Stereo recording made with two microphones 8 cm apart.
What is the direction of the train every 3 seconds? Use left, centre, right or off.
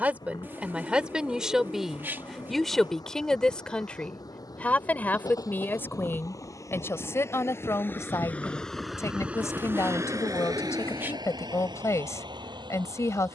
left, left, left, right, right.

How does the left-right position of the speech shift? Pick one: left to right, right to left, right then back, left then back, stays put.
right to left.